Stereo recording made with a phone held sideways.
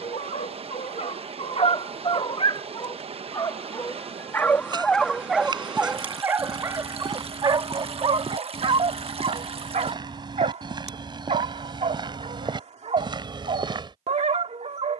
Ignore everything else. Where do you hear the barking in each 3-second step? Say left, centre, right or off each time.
left, centre, right, right, right.